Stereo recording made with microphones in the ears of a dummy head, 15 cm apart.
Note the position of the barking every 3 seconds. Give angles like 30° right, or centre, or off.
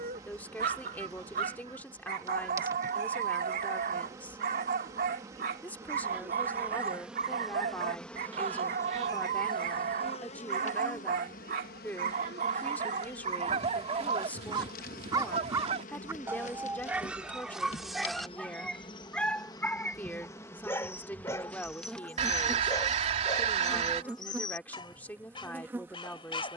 50° right, 50° right, 50° right, 50° right, 40° right, 10° right, 10° left, 20° left, 30° left.